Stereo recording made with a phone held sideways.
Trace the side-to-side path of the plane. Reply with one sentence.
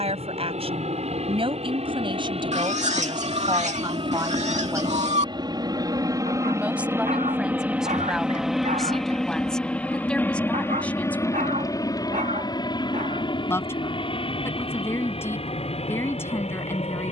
In this clip you hear the plane travel towards the left.